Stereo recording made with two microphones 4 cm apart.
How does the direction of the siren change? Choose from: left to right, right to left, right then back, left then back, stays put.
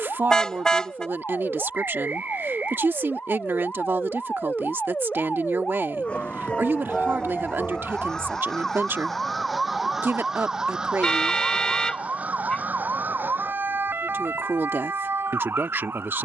left to right.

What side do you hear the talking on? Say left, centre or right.
right.